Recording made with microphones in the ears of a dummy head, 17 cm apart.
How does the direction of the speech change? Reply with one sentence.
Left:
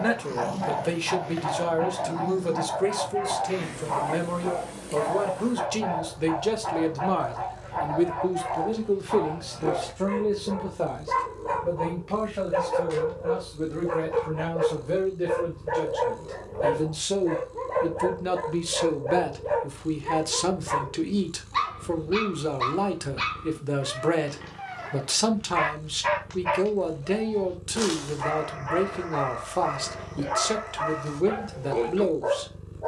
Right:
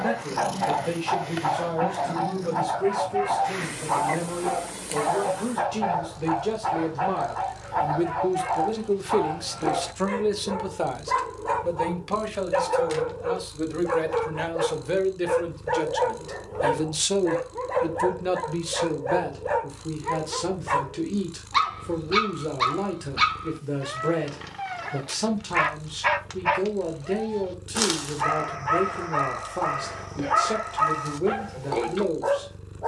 In this clip you hear the speech move from left to right and back again.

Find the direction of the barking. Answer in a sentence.
You can hear the barking on the right.